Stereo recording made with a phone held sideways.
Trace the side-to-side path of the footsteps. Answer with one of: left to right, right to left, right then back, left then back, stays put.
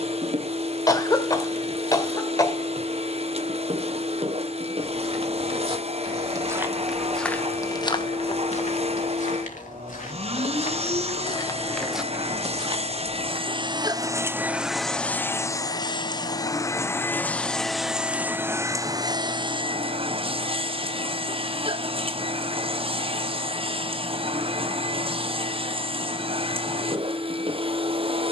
left then back.